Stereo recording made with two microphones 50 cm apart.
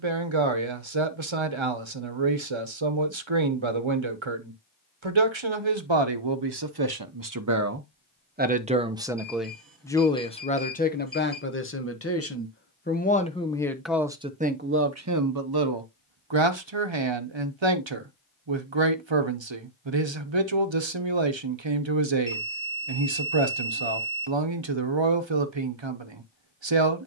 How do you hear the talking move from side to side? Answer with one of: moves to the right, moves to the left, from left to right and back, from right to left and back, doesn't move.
from right to left and back.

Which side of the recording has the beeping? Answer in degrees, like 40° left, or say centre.
40° right.